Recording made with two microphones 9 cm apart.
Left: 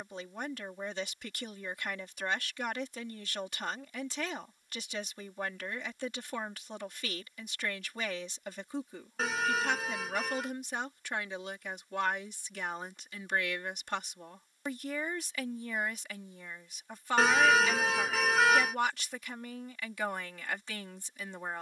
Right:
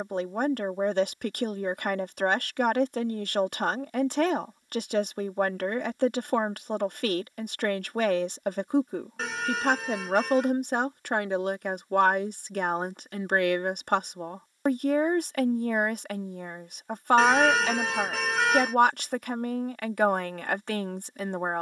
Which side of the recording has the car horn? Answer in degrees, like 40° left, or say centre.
centre.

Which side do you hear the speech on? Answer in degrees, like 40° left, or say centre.
50° right.